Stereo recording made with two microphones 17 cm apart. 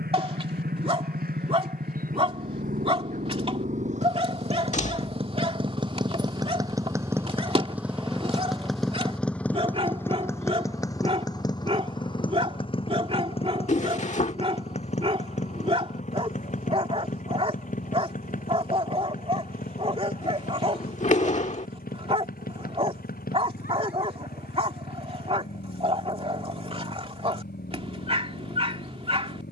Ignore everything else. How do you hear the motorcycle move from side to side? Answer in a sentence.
In this clip you hear the motorcycle travel towards the left.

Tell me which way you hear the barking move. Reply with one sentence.
In this clip you hear the barking stay put.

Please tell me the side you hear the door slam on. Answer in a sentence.
In this clip you hear the door slam on the left.